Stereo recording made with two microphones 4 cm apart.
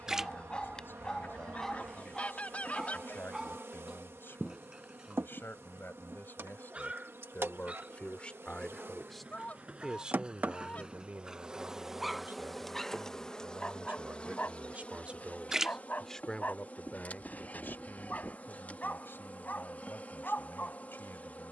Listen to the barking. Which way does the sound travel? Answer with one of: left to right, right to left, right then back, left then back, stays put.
right then back.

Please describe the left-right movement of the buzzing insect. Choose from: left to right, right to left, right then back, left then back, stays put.
right to left.